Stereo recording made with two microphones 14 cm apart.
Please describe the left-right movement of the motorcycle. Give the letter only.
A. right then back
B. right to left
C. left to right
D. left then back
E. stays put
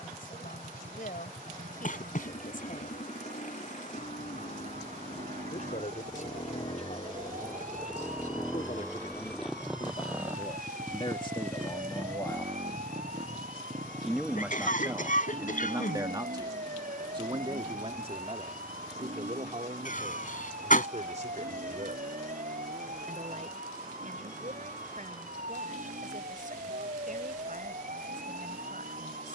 C.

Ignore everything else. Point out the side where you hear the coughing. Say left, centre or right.
left.